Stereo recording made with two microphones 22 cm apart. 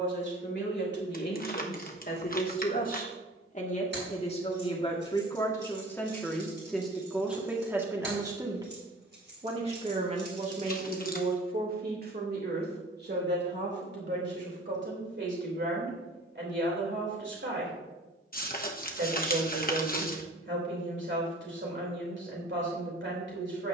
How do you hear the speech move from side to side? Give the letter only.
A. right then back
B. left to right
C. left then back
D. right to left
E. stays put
B.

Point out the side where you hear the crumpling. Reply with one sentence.
In this clip you hear the crumpling on the left.